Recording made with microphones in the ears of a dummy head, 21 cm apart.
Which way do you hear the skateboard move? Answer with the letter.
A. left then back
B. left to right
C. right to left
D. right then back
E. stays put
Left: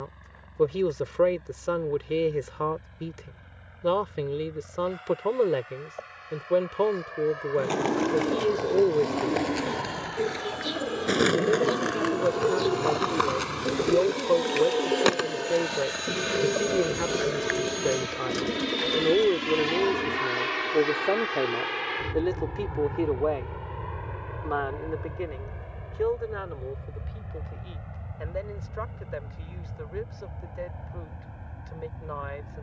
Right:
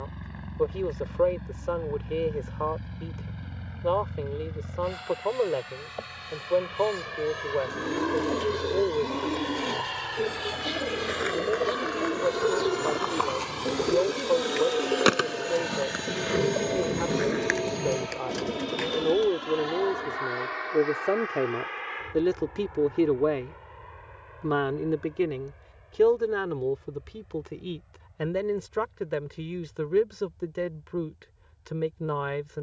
B.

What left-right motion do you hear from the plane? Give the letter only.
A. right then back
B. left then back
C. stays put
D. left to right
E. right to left
E.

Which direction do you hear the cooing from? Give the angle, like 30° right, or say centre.
10° left.